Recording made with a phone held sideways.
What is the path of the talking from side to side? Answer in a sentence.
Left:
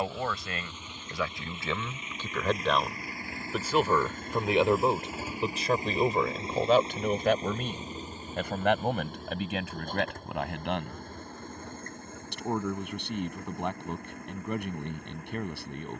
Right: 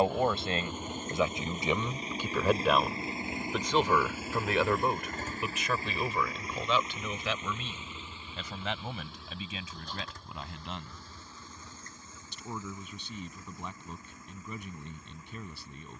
In this clip you hear the talking travel towards the left.